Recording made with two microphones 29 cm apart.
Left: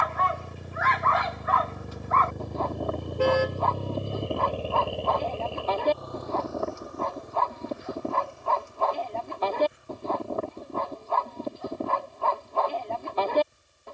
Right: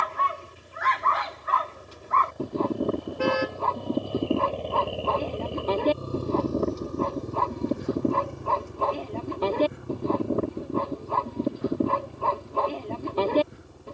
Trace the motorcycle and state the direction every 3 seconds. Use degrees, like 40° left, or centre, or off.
70° left, 10° left, 50° right, 70° right, 70° right.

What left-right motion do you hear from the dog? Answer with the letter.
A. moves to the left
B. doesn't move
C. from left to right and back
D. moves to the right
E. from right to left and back
B.